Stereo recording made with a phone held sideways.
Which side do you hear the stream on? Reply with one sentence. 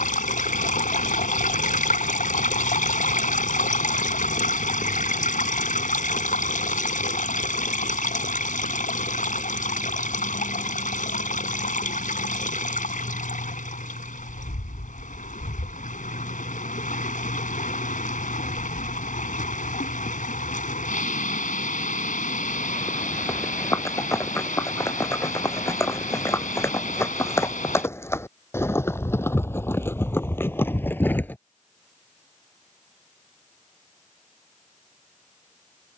You can hear the stream on the left.